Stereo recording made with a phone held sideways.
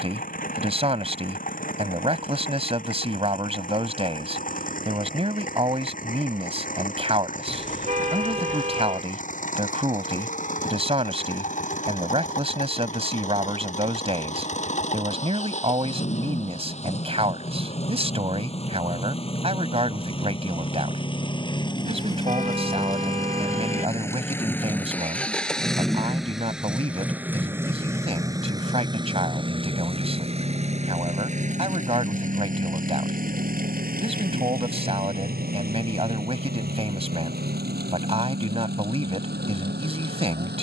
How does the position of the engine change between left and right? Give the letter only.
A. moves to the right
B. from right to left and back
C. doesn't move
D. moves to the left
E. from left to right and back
A.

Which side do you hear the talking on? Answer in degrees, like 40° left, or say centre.
40° right.